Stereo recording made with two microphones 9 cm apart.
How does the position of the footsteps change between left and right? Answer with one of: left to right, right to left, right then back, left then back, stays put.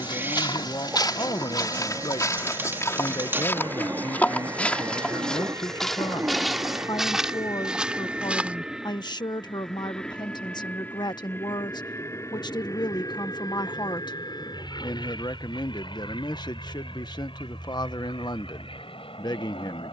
left to right.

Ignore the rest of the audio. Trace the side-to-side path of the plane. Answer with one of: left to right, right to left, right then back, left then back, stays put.
right to left.